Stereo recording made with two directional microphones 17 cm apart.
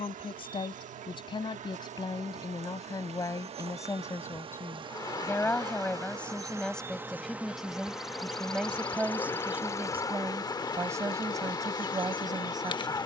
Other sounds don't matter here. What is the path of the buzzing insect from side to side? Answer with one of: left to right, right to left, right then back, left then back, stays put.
right to left.